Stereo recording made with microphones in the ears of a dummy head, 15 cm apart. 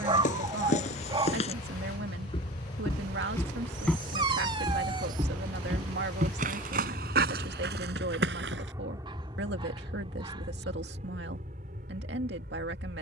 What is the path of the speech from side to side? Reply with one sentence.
You can hear the speech stay put.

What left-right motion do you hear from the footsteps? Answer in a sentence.
You can hear the footsteps move from left to right.